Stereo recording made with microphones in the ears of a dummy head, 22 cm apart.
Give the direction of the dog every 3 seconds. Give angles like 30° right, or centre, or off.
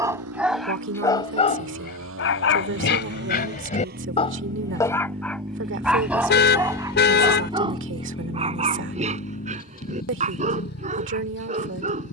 30° left, 20° left, 20° right, 30° right.